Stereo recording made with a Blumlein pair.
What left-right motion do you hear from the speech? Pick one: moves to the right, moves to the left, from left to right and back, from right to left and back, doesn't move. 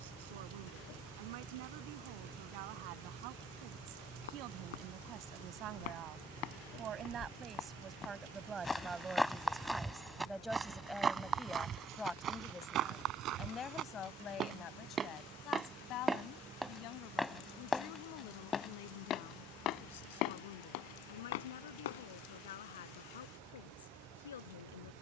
moves to the left.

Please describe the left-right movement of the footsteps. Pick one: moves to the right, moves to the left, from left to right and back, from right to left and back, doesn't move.
from left to right and back.